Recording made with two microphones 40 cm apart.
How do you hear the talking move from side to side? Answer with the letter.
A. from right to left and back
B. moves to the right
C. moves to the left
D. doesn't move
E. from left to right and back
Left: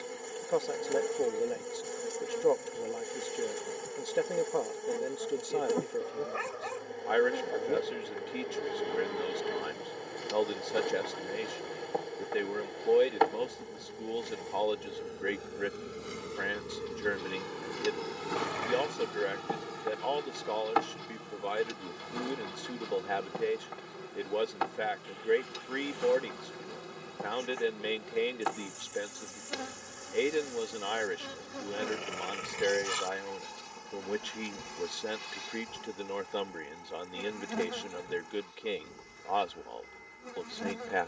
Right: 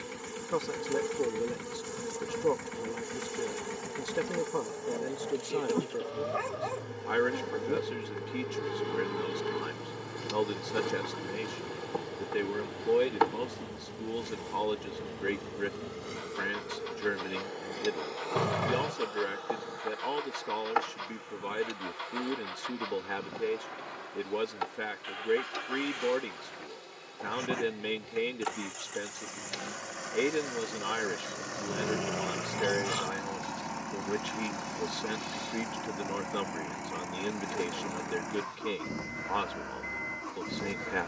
D.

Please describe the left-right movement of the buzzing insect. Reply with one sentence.
In this clip you hear the buzzing insect move from right to left.